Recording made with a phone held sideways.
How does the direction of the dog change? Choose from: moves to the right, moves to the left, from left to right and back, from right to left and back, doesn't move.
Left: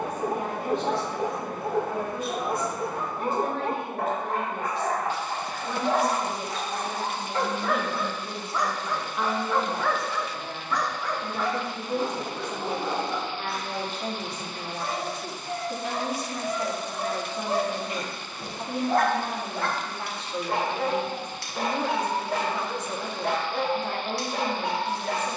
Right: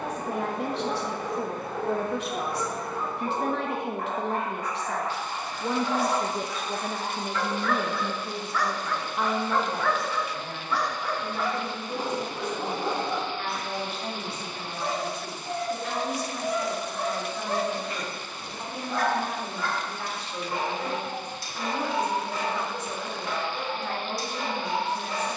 from left to right and back.